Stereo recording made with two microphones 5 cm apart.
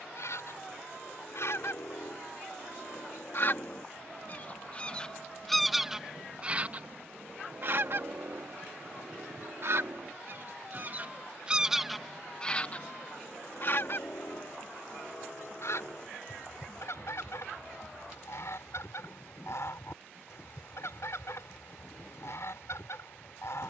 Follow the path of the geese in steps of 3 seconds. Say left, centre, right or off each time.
left, left, right, right, left, left, left, left.